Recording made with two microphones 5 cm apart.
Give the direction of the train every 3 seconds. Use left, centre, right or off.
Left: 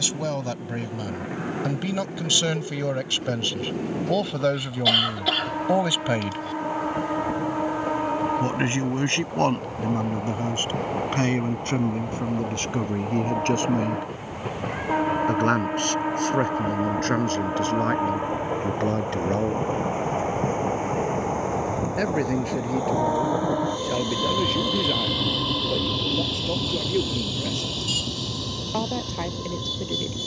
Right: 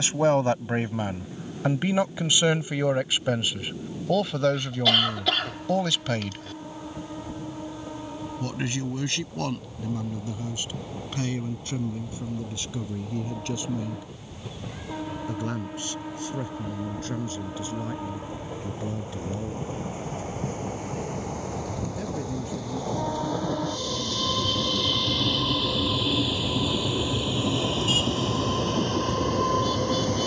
left, left, left, left, left, left, left, left, centre, right.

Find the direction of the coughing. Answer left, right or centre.
centre.